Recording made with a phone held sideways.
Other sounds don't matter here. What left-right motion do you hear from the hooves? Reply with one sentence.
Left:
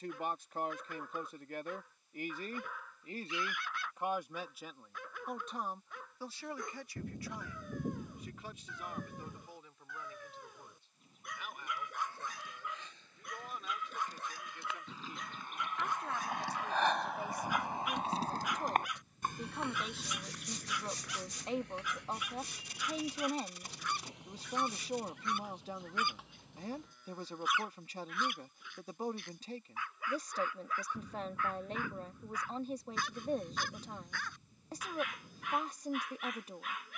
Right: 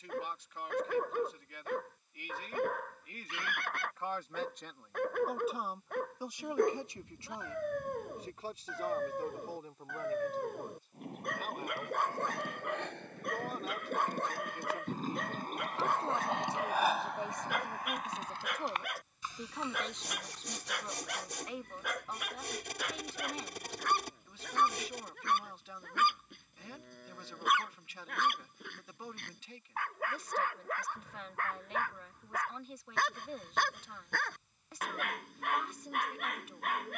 You can hear the hooves move to the left.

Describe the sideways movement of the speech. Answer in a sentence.
In this clip you hear the speech go right and come back.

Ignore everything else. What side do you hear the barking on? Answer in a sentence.
In this clip you hear the barking on the right.